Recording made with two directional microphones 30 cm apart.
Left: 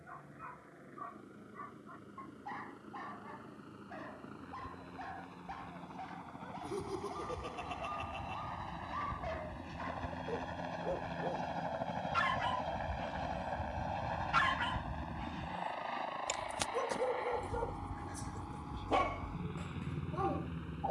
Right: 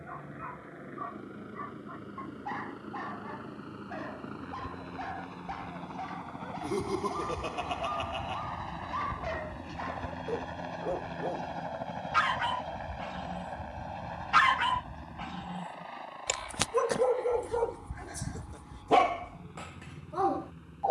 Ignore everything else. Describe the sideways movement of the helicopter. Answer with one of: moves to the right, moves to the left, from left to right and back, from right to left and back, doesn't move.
moves to the left.